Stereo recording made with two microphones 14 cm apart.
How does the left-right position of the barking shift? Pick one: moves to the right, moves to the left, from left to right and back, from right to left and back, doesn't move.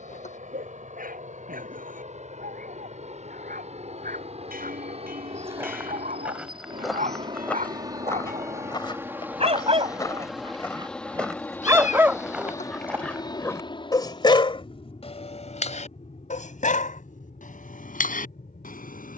moves to the left.